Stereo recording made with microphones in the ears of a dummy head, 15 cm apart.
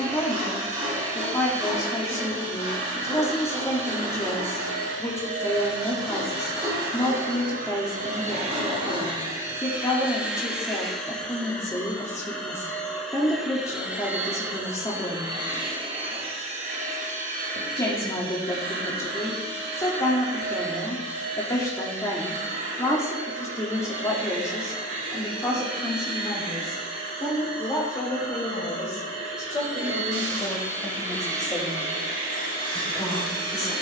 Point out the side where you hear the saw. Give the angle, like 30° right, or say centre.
30° right.